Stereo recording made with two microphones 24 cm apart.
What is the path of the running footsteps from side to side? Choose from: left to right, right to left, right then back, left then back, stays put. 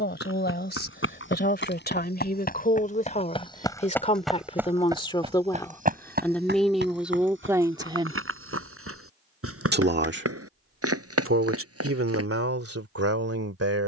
left to right.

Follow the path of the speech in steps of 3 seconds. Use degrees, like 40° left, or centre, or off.
40° left, 20° left, 10° right, 60° right, 70° right.